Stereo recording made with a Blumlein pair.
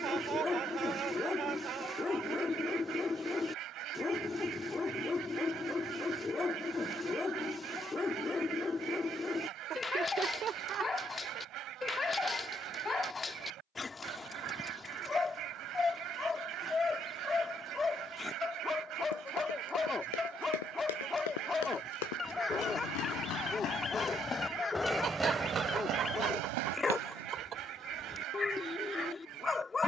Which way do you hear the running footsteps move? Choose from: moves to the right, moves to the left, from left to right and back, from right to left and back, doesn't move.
moves to the right.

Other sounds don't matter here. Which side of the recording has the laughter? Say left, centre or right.
right.